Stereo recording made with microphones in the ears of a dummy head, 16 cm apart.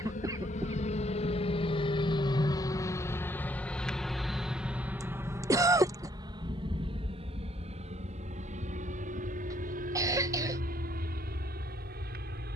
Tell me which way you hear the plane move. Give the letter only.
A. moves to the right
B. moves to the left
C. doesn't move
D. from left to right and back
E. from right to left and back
A.